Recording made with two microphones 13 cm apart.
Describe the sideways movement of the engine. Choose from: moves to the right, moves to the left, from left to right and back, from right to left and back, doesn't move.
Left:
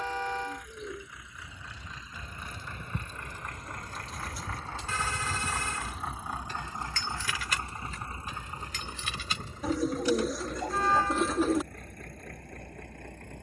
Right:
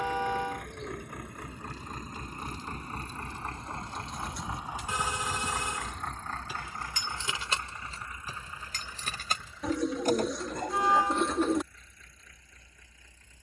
moves to the left.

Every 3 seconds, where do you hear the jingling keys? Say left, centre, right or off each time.
left, left, right, right, off.